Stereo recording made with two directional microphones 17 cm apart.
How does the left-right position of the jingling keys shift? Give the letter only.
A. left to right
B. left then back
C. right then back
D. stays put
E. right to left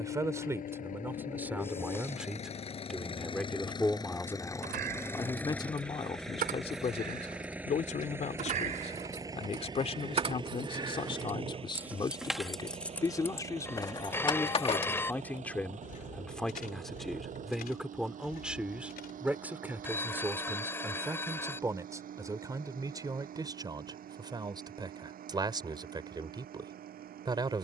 E.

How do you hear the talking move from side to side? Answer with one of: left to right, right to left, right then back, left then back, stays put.
left then back.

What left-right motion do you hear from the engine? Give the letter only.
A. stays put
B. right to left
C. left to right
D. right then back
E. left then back
C.